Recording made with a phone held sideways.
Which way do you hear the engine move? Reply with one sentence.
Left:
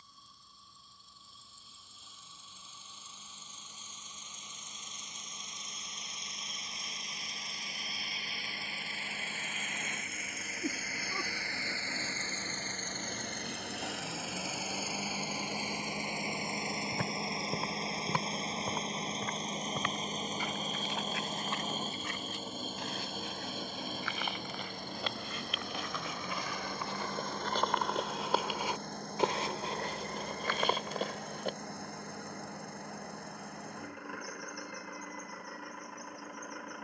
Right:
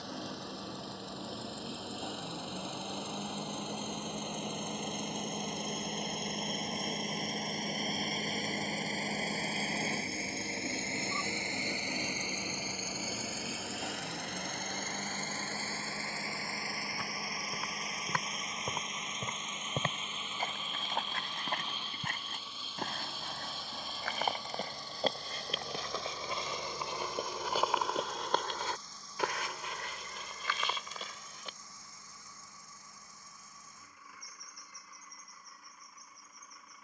You can hear the engine travel towards the left.